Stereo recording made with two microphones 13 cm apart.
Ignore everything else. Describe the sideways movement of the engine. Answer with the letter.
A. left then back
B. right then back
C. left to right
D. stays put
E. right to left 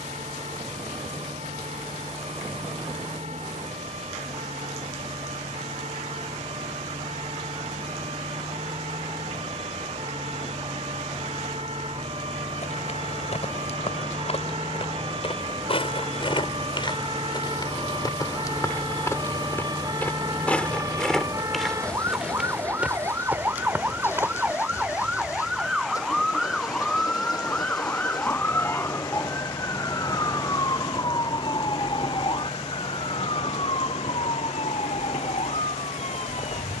E.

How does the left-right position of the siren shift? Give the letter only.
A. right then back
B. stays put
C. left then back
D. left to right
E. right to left
E.